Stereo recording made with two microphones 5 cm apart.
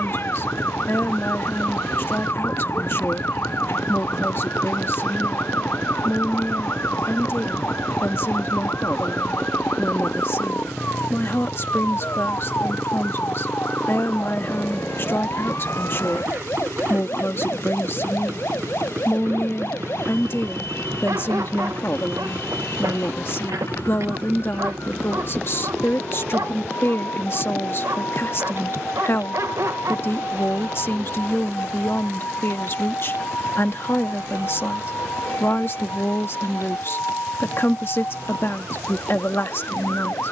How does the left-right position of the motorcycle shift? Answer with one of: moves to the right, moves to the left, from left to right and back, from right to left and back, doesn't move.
moves to the right.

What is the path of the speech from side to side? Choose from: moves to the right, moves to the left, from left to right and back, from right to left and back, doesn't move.
doesn't move.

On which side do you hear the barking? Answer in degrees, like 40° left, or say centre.
70° right.